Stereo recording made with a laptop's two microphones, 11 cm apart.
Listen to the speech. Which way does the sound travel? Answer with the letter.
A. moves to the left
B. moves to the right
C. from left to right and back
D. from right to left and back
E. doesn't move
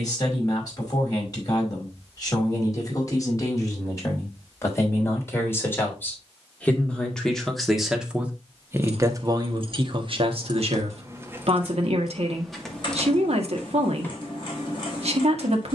B.